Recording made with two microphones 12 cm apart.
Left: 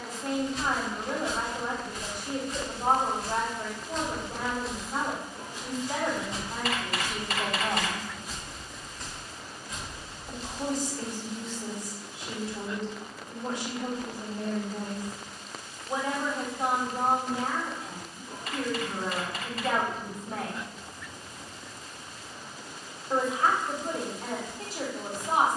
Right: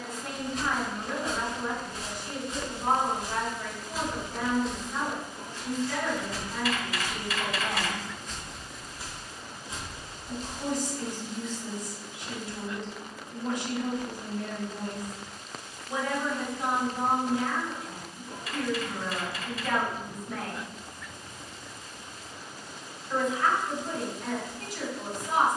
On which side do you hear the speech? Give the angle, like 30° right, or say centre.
40° left.